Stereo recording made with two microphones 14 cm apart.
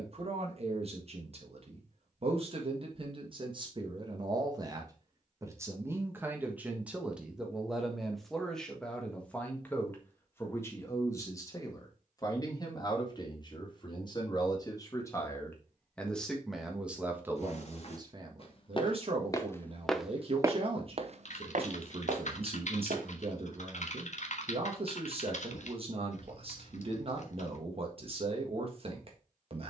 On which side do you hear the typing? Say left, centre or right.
left.